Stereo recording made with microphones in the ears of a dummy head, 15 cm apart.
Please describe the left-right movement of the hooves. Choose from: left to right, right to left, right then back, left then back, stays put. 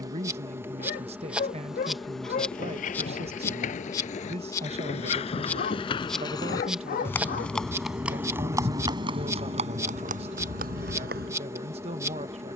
left to right.